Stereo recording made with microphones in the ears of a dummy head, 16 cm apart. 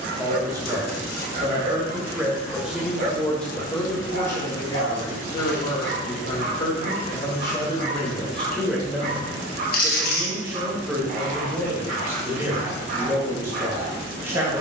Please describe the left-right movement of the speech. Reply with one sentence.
You can hear the speech move from right to left and back again.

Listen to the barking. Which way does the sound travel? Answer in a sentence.
You can hear the barking stay put.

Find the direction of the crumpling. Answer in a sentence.
You can hear the crumpling on the left.